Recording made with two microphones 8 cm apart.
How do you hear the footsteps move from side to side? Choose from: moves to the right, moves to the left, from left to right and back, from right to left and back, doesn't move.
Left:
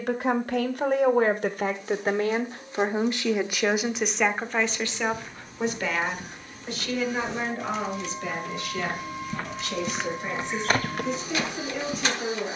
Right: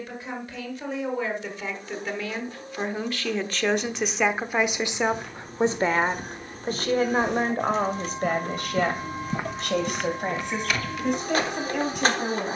moves to the left.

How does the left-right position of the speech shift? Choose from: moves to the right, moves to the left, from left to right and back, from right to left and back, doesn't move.
moves to the right.